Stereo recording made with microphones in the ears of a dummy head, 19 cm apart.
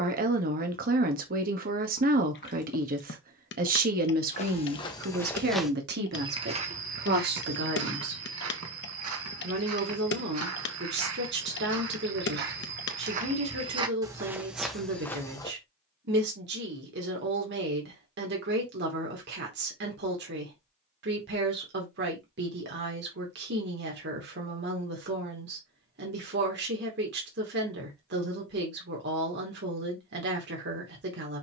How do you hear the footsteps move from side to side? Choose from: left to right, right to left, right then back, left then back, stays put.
right then back.